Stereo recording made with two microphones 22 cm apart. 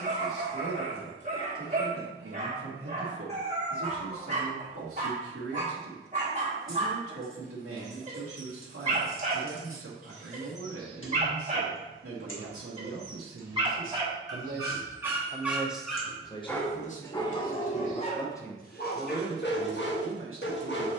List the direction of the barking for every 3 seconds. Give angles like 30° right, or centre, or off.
30° right, 30° right, 30° right, 30° right, 20° right, 10° left, 50° left.